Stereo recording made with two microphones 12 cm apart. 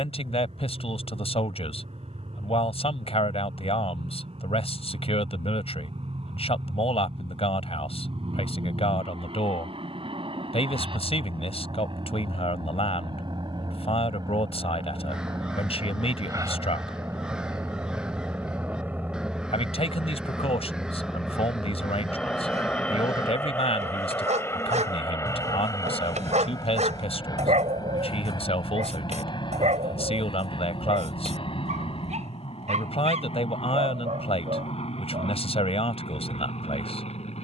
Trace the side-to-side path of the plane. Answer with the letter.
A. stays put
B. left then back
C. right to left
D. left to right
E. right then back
C.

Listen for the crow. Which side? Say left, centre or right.
centre.